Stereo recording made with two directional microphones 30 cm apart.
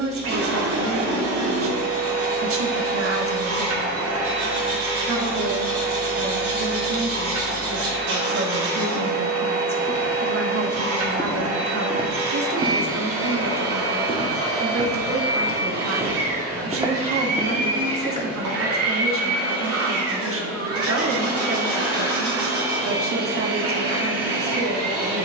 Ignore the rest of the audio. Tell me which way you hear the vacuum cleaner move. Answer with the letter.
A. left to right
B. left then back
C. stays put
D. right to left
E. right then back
C.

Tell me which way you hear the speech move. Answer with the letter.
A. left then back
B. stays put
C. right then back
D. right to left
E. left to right
B.